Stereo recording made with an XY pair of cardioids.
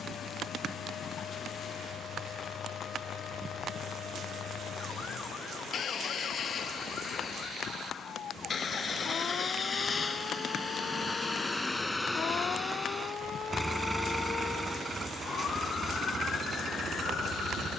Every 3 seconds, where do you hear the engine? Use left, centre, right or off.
left, left, left, left, centre, right.